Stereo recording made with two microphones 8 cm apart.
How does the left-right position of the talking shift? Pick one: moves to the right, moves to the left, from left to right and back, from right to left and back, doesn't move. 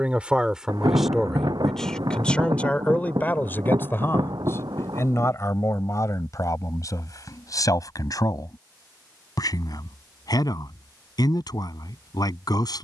moves to the left.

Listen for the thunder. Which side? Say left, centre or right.
right.